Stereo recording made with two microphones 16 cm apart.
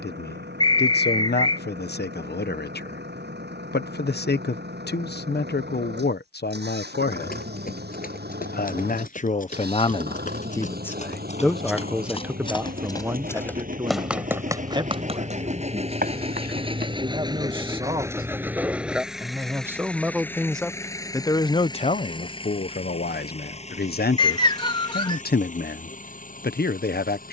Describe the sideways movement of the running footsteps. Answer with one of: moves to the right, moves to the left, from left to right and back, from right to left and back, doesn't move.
moves to the right.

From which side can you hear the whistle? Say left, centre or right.
left.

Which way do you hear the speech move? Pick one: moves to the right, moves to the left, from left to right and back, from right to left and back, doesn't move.
from left to right and back.